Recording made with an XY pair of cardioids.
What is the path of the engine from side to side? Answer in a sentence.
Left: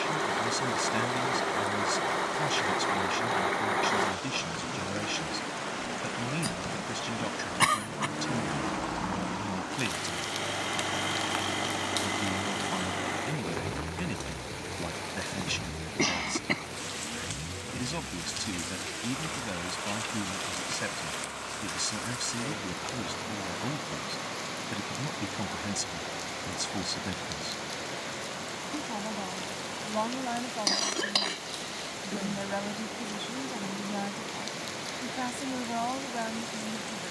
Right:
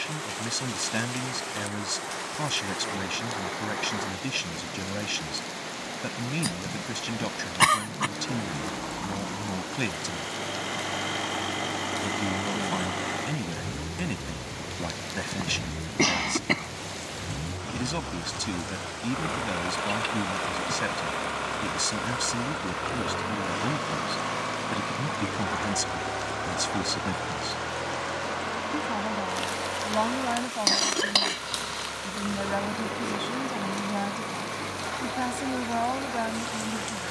You can hear the engine move from left to right.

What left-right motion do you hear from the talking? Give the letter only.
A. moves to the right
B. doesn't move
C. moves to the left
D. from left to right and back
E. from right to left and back
B.